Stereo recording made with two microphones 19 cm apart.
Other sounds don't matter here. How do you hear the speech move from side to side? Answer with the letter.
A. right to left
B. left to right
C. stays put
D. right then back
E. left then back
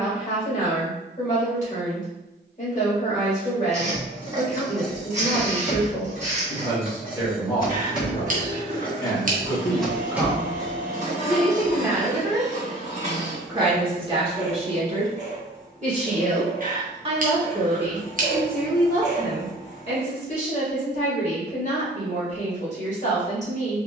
D.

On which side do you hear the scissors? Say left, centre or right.
right.